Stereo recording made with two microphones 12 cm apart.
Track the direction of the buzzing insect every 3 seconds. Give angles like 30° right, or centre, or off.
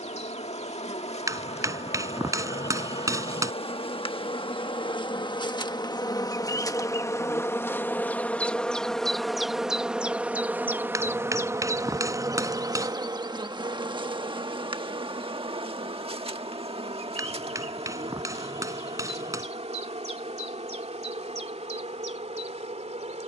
60° left, 50° left, 20° left, 10° right, 40° right, 50° right, 60° right, 70° right.